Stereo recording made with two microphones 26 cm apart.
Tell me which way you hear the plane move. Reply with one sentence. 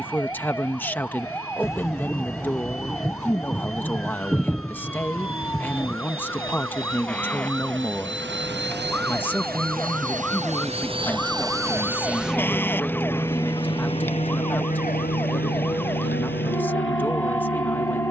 You can hear the plane move to the left.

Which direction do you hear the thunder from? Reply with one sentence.
You can hear the thunder in the centre.